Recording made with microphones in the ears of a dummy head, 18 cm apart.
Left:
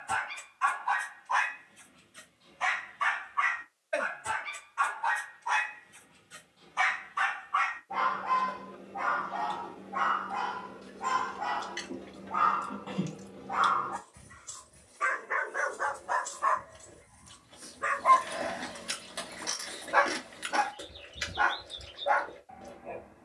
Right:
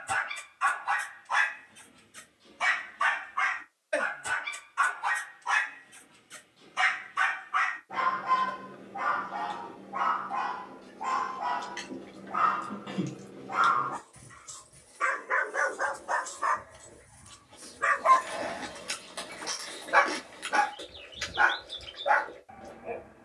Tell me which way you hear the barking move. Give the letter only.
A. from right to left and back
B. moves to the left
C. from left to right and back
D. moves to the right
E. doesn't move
A.